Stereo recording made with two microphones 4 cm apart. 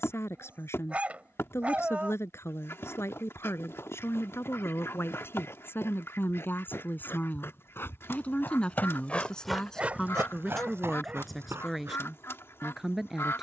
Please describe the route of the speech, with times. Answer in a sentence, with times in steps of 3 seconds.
In this clip you hear the speech on the left from 0 s and in the centre from 9 s.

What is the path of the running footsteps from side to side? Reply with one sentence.
You can hear the running footsteps travel towards the right.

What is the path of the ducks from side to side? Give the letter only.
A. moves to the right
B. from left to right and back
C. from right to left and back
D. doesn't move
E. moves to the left
D.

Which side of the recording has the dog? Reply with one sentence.
You can hear the dog on the right.